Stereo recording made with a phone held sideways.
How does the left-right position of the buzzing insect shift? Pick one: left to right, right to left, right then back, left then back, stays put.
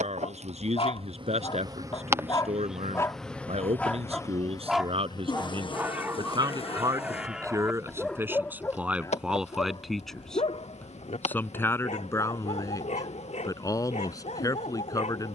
right to left.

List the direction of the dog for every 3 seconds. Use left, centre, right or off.
left, centre, centre, left, left.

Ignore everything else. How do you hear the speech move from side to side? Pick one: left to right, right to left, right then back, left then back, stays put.
right to left.